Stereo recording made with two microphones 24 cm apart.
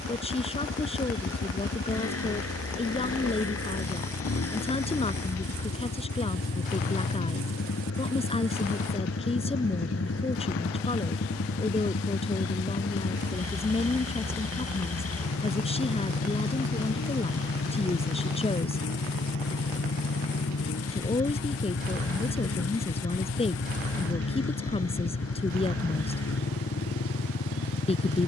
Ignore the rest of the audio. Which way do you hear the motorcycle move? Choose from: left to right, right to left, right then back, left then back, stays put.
stays put.